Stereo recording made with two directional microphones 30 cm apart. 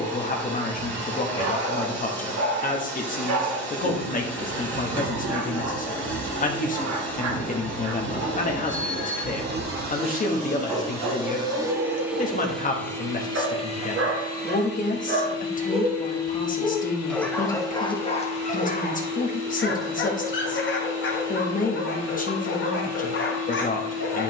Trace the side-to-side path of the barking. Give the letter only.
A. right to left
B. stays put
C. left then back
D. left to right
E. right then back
A.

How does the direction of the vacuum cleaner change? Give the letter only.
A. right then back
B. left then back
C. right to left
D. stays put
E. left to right
C.